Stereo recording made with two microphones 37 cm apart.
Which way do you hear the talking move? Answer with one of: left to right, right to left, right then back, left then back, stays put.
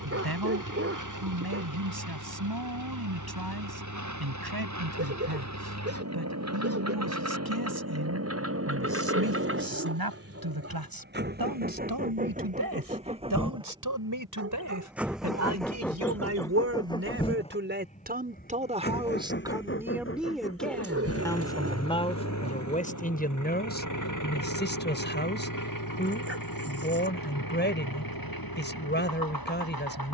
right to left.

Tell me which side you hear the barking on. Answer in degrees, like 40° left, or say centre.
40° right.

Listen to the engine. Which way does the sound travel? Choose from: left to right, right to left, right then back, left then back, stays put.
right to left.